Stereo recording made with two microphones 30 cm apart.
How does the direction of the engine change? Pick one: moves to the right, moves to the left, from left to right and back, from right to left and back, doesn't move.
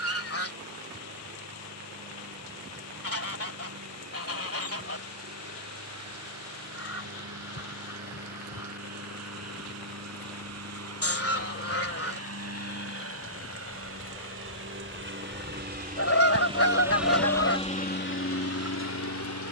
moves to the left.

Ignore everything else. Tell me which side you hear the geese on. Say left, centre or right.
left.